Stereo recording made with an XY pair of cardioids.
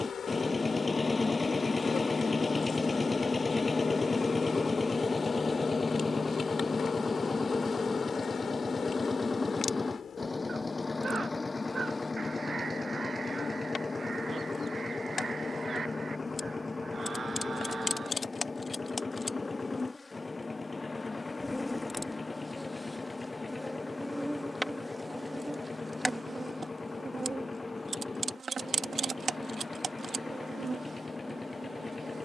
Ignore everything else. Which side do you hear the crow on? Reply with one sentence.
You can hear the crow on the right.